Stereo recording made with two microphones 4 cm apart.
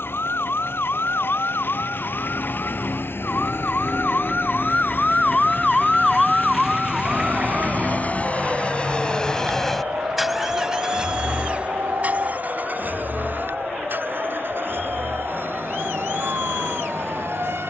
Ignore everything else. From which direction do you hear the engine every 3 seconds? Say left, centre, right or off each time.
left, left, left, centre, right, right.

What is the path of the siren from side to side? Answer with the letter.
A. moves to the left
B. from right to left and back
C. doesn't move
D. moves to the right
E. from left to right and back
D.